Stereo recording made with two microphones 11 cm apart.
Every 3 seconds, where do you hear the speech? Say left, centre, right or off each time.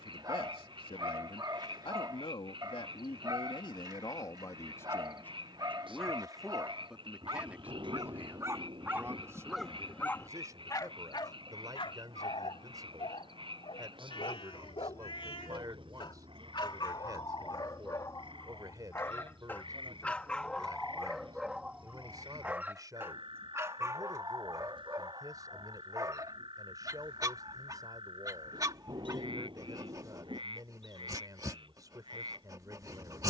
left, left, centre, right, right, right, right, right, right, right, right.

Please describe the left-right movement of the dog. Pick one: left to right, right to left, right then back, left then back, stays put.
left then back.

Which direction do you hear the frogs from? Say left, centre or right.
right.